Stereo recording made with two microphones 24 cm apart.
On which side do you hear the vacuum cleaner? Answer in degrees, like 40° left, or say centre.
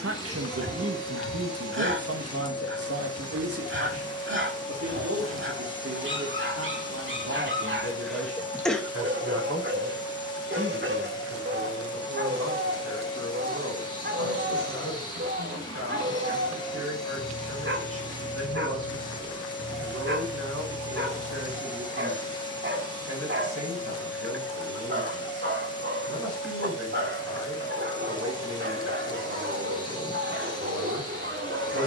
20° left.